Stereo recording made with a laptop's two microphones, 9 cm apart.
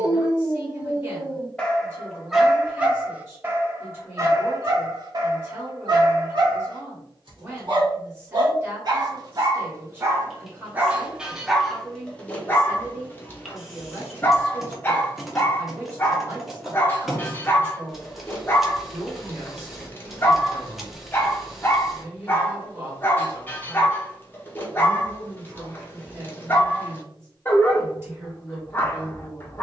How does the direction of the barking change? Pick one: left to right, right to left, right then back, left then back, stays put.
right then back.